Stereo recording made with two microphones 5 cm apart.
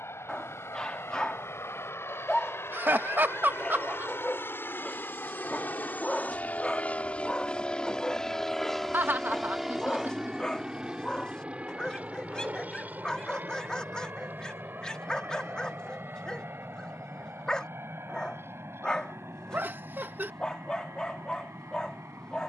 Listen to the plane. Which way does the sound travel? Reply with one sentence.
In this clip you hear the plane move from left to right.